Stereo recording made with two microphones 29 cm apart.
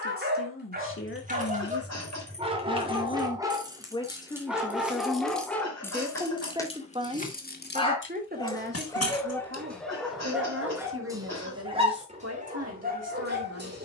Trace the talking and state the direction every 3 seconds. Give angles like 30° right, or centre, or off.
40° left, 10° left, 20° right, 50° right, 60° right.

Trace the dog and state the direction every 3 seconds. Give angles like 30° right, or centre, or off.
30° right, centre, 10° left, centre, 30° right.